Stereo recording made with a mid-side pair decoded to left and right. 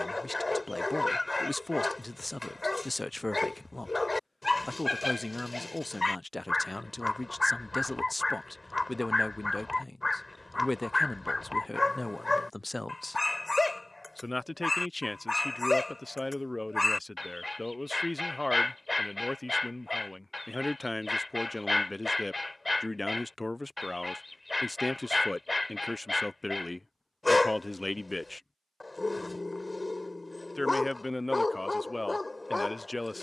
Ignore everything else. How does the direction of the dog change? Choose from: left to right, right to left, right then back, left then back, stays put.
stays put.